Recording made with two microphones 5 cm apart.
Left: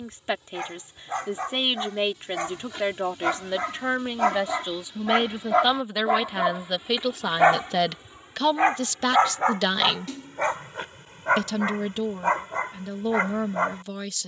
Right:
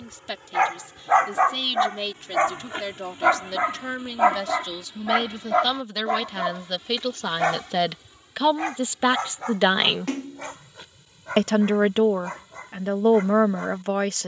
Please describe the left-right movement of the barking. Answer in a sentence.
In this clip you hear the barking move from right to left.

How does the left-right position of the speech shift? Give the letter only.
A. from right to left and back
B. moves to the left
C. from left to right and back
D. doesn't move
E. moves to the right
E.